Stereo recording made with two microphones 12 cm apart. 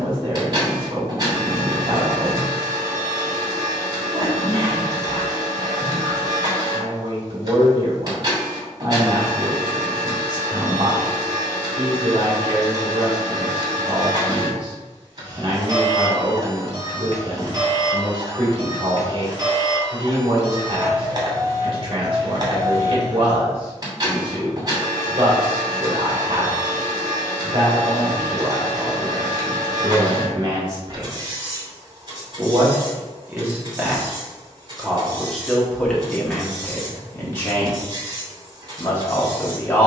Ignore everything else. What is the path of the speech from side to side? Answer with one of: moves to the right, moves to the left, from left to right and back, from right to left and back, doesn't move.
moves to the left.